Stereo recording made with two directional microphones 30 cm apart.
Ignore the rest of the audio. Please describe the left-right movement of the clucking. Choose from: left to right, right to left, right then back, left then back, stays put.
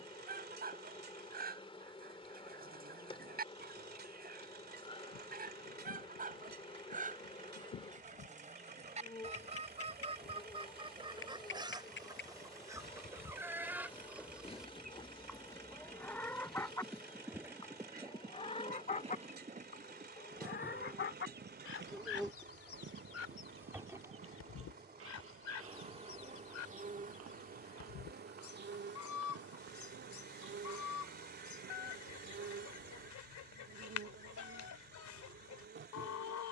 right to left.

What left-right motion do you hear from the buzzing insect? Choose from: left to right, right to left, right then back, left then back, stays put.
left to right.